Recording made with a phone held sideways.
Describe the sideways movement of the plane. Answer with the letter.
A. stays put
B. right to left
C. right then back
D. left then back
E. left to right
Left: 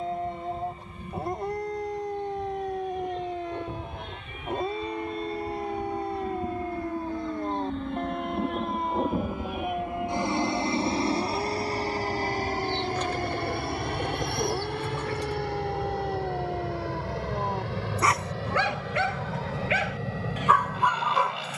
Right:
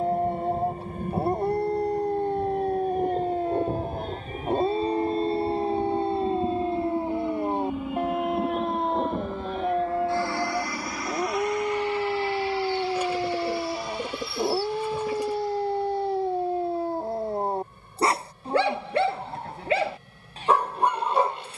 B.